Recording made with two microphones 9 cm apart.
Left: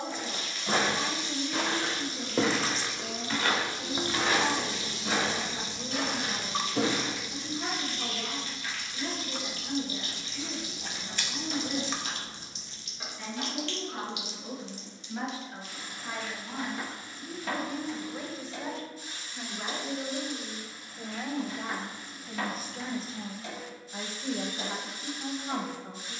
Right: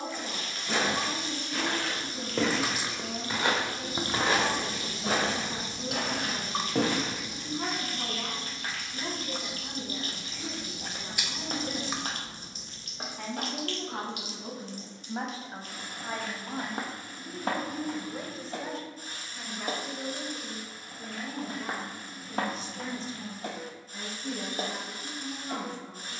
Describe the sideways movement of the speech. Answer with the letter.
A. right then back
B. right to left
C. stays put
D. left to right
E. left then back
B.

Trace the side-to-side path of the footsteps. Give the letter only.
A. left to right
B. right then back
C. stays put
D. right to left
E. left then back
A.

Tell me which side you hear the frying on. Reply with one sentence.
In this clip you hear the frying on the right.